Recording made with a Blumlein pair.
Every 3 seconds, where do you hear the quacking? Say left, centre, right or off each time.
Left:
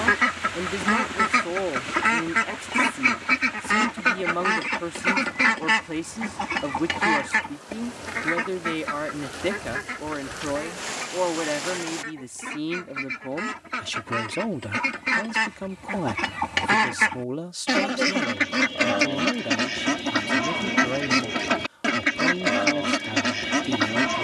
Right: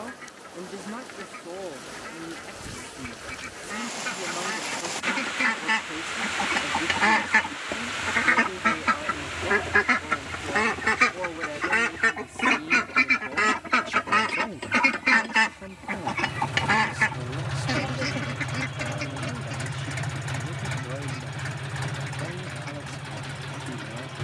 left, left, centre, right, right, centre, left, left.